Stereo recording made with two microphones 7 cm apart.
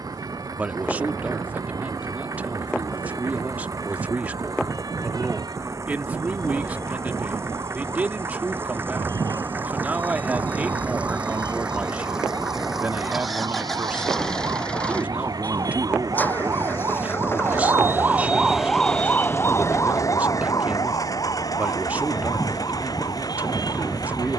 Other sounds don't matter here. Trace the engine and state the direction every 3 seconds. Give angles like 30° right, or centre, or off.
60° right, 50° right, 40° right, 20° right, centre, 30° left, 50° left, 60° left.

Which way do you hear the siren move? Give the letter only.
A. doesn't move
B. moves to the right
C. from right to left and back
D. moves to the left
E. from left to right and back
D.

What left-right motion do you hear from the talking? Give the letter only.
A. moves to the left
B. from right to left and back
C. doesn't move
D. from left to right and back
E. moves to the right
C.